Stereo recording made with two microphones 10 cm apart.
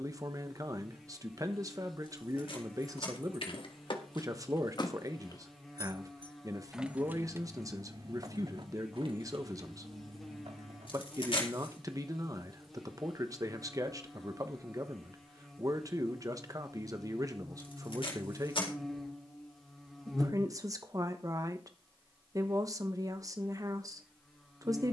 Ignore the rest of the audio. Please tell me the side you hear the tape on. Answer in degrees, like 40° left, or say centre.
60° left.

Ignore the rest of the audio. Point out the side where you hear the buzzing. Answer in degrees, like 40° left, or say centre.
centre.